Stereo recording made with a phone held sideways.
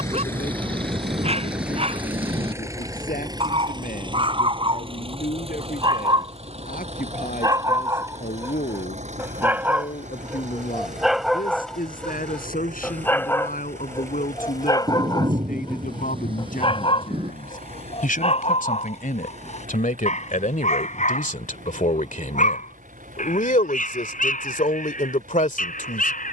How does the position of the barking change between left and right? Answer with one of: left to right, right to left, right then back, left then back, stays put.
right to left.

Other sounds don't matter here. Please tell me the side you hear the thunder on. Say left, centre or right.
right.